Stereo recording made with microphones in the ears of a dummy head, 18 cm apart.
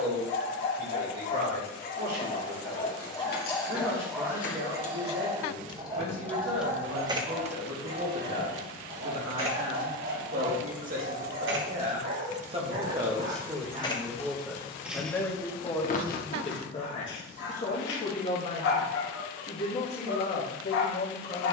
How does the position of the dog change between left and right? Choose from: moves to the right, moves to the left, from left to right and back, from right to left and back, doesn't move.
from left to right and back.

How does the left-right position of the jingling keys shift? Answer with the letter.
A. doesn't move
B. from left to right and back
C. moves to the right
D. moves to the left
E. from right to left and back
B.